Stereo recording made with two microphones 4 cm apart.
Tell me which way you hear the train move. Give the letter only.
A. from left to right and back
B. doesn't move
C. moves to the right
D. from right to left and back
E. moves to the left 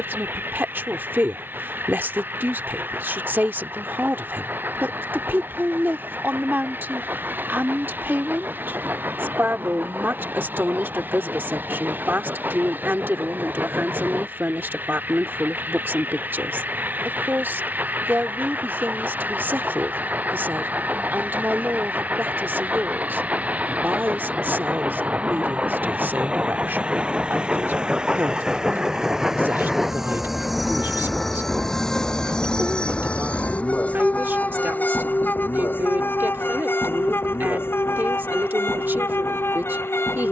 E.